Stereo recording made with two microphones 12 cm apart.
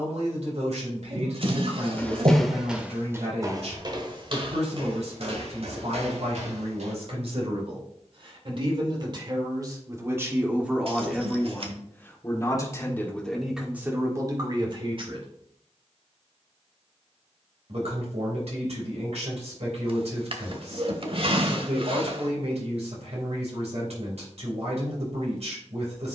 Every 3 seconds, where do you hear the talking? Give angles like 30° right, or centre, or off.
70° right, 70° right, 50° right, 10° right, 10° right, 60° right, 60° right, 60° right, 60° right.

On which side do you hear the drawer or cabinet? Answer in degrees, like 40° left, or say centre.
50° right.